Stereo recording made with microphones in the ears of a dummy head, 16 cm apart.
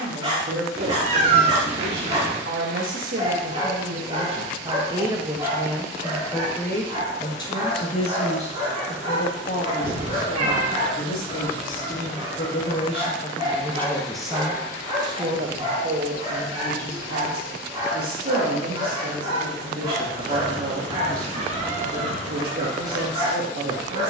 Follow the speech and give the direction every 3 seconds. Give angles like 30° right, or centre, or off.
60° right, 30° right, 20° left, 50° left, 20° left, 50° right, 60° right, 60° right.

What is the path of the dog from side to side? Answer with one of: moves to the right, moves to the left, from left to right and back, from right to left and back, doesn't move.
doesn't move.